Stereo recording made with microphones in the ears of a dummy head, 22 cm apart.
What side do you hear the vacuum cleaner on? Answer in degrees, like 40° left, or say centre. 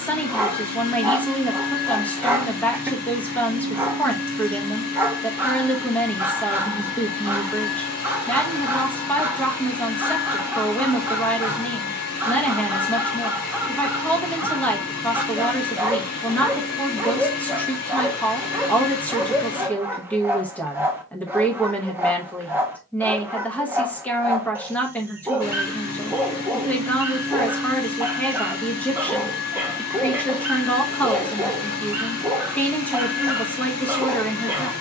60° left.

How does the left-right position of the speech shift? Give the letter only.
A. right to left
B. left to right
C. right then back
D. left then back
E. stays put
E.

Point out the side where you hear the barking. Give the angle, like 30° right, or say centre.
10° right.